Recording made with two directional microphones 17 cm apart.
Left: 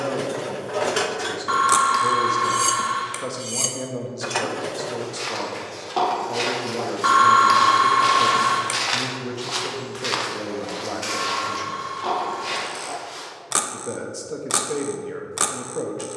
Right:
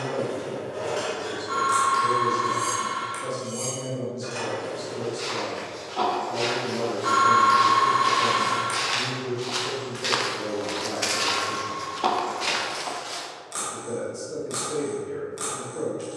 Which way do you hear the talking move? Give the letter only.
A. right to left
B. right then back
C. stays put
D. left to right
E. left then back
C.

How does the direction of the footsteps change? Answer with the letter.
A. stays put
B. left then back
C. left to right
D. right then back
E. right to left
C.